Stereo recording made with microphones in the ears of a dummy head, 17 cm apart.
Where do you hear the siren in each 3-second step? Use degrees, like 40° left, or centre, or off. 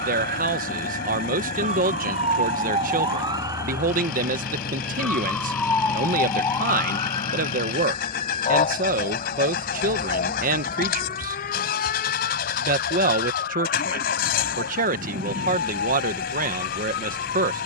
40° right, 10° right, 30° left, 50° left, 60° left, 60° left.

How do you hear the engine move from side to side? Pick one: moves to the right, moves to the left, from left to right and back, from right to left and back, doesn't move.
doesn't move.